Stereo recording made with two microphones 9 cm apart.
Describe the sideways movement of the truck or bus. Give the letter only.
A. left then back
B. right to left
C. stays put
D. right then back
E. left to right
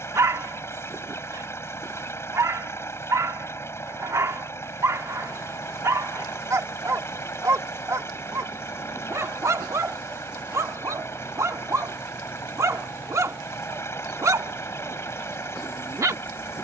C.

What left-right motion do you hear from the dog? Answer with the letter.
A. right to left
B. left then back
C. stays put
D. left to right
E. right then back
C.